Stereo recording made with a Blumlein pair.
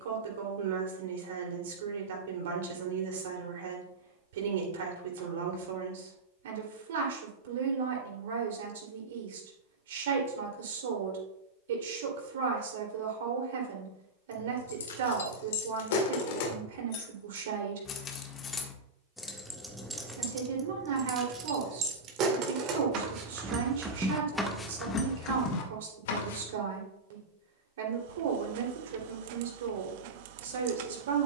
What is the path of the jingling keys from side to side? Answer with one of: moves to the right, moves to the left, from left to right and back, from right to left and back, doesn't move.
from left to right and back.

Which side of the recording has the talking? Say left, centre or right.
right.